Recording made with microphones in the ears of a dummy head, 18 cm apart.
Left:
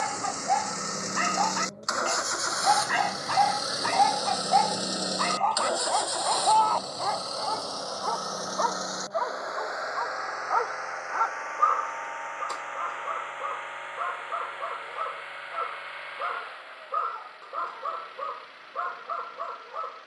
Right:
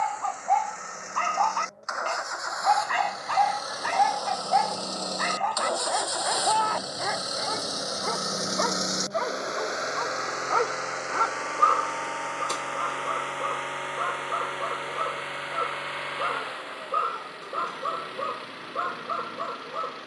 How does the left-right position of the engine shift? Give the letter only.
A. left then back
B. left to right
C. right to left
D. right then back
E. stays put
B.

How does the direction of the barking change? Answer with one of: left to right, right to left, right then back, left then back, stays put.
left to right.